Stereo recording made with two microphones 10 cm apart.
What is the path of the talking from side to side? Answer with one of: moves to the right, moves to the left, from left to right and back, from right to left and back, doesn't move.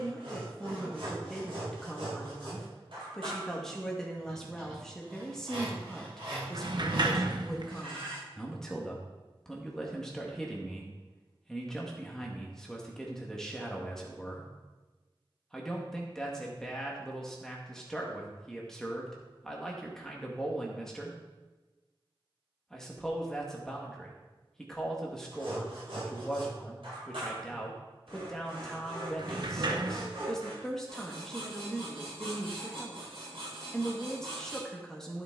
doesn't move.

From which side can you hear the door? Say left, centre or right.
right.